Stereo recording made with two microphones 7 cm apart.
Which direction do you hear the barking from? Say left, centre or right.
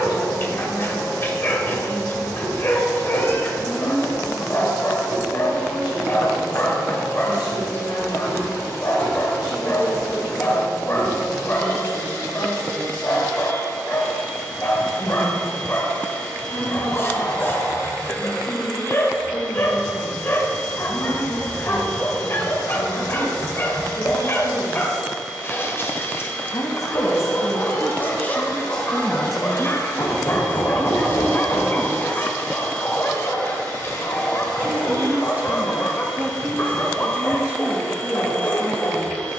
left.